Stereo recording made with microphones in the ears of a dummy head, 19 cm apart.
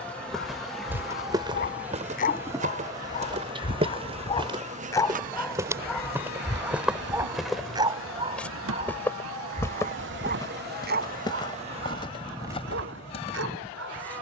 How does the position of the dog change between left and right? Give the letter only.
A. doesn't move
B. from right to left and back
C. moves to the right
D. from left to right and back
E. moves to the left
C.